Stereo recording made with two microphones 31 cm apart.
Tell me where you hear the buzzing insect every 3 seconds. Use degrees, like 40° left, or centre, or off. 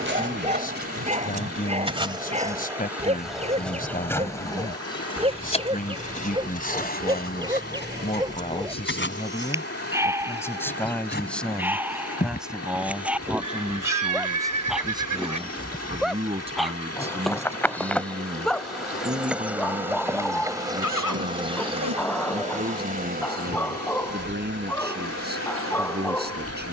20° right, 10° left, 30° left, 30° left, 20° left, 10° left, 10° right, 20° right, 40° right.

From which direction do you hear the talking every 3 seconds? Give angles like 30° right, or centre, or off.
30° left, 30° left, 20° left, 10° left, 10° right, 20° right, 30° right, 30° right, 30° right.